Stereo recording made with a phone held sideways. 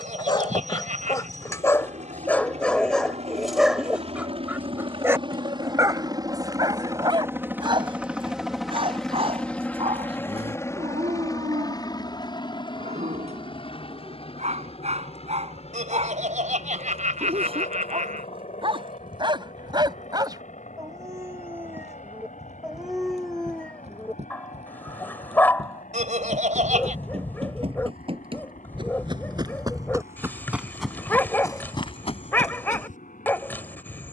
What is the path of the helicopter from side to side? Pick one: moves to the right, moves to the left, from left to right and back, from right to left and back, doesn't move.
moves to the left.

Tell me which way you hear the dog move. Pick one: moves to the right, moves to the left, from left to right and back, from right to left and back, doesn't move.
from left to right and back.